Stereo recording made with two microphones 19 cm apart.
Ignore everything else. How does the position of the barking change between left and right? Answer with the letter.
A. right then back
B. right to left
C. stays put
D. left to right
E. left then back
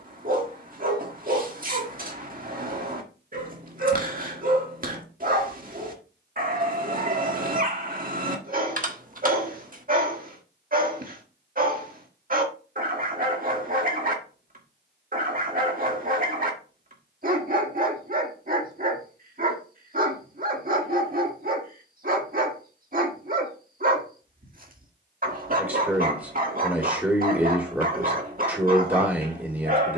C.